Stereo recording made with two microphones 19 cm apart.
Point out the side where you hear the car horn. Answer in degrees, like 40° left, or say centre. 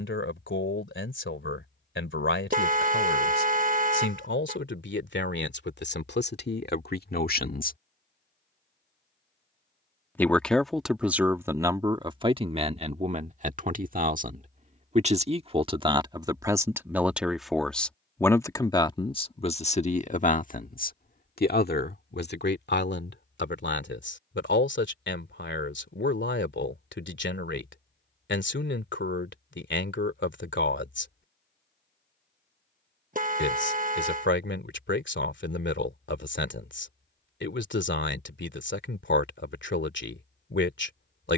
40° right.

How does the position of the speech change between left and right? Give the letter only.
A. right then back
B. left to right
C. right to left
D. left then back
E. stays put
A.